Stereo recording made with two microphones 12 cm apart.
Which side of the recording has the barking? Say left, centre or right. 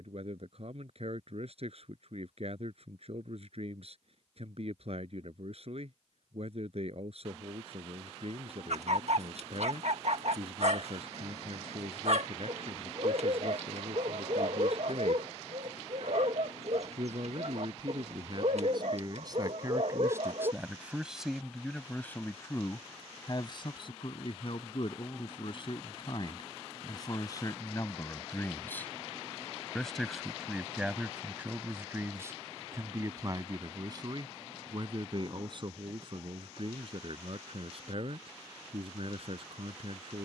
right.